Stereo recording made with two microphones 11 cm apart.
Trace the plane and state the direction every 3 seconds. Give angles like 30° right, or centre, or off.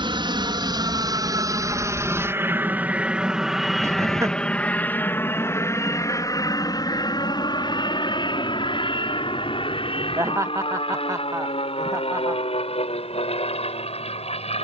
30° right, 10° left, 40° left, 50° left, 60° left.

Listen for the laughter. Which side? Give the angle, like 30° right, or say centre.
30° right.